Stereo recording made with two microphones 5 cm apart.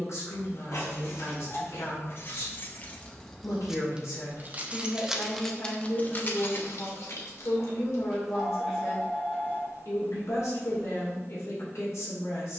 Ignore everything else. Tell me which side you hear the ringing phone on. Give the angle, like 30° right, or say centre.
10° left.